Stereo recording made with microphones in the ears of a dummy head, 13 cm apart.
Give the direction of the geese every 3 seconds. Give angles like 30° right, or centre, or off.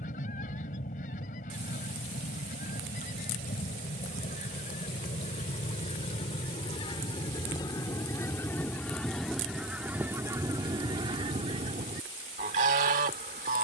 60° left, 50° left, 30° left, 20° right, 50° right.